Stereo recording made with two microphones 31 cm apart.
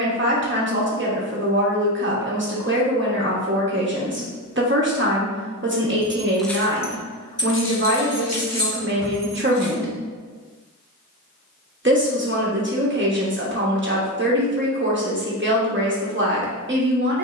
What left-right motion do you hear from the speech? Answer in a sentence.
You can hear the speech stay put.